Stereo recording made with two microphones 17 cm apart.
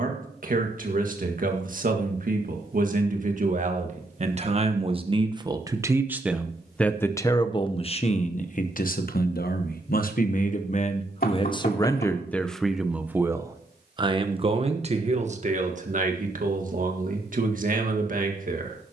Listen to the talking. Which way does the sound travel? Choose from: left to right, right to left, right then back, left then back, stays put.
left then back.